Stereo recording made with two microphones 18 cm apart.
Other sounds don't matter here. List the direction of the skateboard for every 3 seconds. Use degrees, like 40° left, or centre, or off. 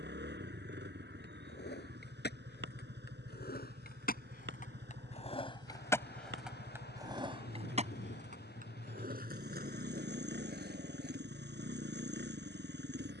70° left, 50° left, 30° right, 60° right, off.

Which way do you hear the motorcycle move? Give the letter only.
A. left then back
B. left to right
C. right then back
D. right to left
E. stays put
E.